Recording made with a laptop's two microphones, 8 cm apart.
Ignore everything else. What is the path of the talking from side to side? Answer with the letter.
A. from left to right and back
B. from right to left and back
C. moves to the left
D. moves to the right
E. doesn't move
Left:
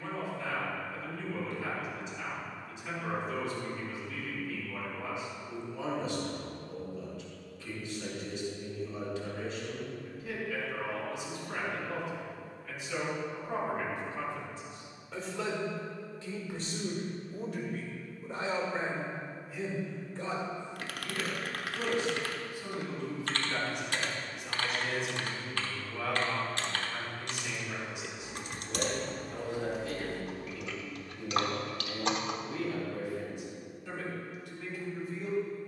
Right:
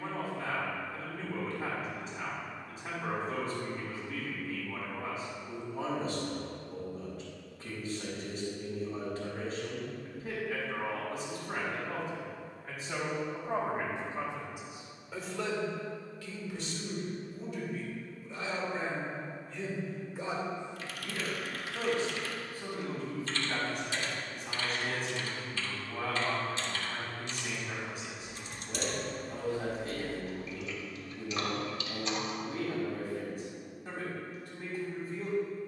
B.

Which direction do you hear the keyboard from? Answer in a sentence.
You can hear the keyboard on the left.